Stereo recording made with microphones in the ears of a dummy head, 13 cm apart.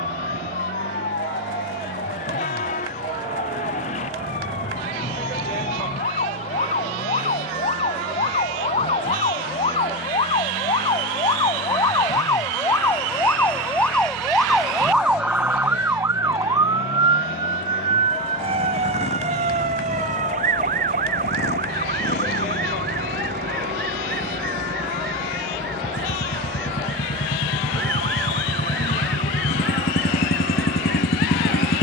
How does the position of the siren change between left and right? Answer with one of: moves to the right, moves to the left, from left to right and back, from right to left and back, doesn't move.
moves to the right.